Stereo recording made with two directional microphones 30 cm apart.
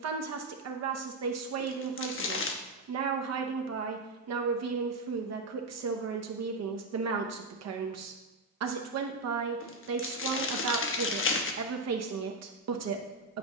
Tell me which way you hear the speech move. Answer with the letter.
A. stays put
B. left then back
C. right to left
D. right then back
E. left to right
A.